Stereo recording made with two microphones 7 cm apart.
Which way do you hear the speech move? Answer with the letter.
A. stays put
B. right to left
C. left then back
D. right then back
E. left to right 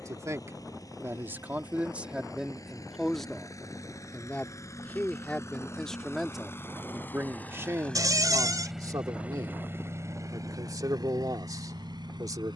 C.